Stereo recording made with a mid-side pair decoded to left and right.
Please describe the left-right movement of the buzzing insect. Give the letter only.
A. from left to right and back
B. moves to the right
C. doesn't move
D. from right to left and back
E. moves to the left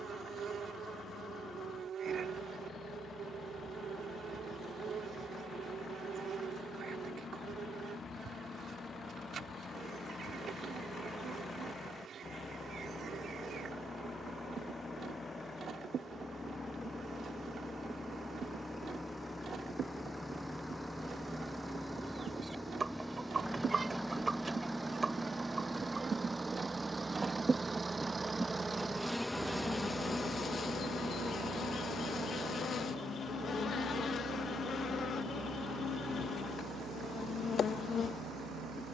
E.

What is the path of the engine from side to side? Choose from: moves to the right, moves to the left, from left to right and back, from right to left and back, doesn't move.
moves to the right.